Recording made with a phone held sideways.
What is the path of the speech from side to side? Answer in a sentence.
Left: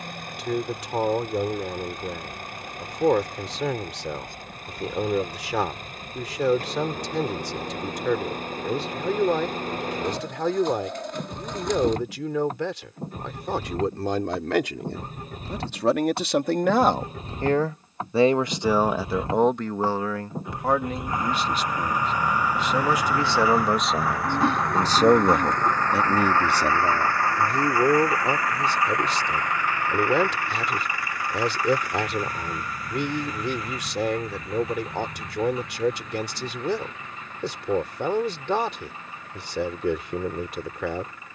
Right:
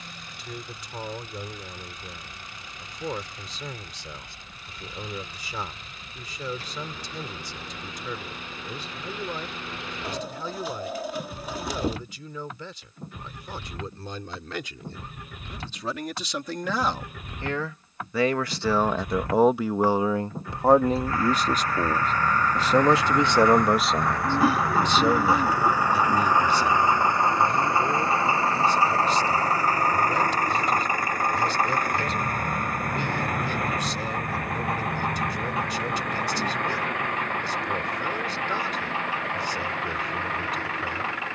In this clip you hear the speech move from left to right and back again.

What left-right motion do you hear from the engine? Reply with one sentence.
In this clip you hear the engine travel towards the right.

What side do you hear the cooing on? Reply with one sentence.
In this clip you hear the cooing in the centre.